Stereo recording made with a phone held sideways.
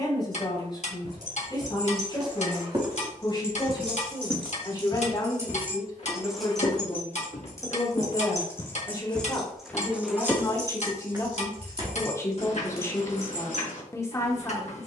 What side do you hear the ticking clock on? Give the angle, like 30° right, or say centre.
50° left.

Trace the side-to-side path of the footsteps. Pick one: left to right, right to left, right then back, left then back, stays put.
left then back.